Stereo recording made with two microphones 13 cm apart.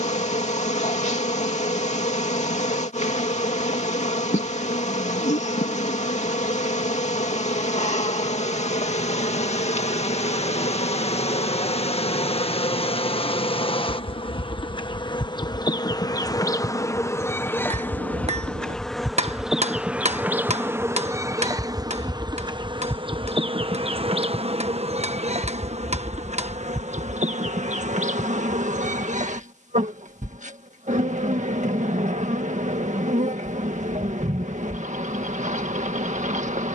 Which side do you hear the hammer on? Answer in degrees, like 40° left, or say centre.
60° right.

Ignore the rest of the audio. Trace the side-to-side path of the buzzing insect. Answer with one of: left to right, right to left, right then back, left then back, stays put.
left to right.